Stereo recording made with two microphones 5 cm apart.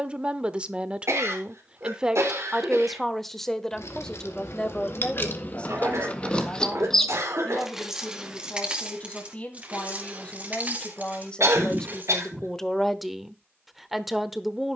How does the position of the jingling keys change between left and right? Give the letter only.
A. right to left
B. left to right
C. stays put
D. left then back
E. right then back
B.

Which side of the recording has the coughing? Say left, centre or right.
right.